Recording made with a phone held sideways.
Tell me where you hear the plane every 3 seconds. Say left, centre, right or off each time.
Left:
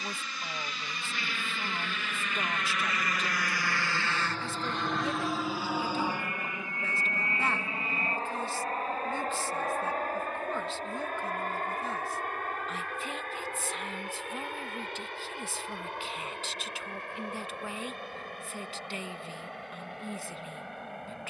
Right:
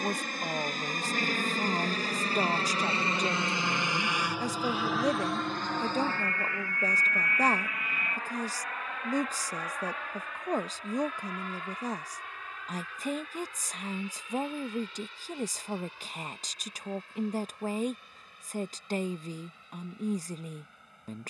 right, centre, left, left, left, left, left.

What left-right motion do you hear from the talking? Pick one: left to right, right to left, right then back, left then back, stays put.
stays put.